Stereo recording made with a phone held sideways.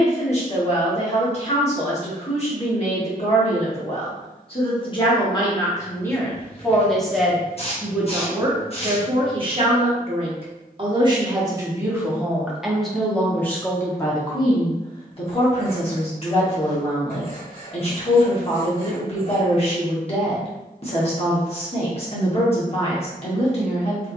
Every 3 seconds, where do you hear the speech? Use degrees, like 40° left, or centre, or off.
40° left, 30° left, 10° right, 30° right, 10° left, 40° left, 40° left, 40° left.